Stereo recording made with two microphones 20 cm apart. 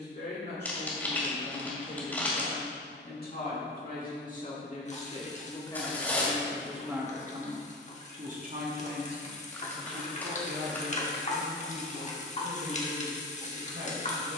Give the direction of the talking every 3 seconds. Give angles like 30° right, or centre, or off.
50° left, 40° left, 20° right, 70° right, 80° right.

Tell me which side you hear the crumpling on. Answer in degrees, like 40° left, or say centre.
10° left.